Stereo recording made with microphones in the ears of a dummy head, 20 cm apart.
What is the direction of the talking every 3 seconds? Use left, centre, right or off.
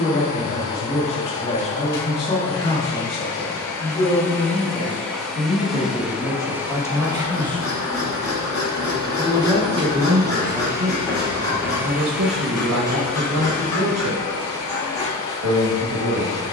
left, left, centre, right, right, right.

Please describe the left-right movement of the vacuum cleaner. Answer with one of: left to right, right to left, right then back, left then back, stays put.
right then back.